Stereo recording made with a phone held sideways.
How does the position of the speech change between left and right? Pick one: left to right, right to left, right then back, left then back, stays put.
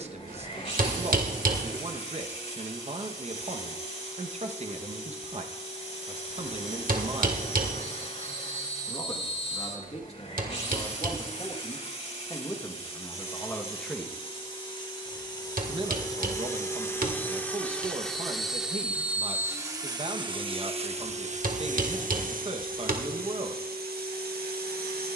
left then back.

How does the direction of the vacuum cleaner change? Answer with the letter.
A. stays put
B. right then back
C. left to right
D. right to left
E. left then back
C.